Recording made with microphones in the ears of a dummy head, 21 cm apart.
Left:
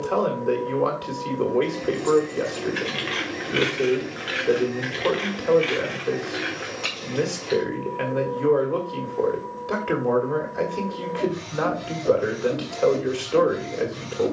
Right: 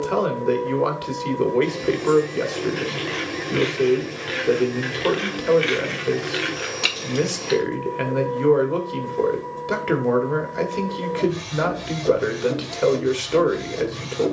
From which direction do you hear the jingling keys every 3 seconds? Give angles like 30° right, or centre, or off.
30° left, centre, 50° right, off, off.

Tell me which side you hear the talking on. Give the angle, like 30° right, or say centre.
30° right.